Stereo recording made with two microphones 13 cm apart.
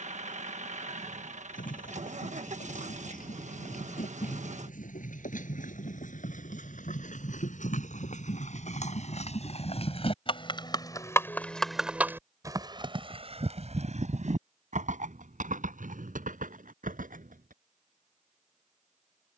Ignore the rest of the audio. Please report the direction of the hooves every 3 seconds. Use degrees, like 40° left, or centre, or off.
80° left, 70° left, 70° left, 30° left, 50° right, 70° right, off.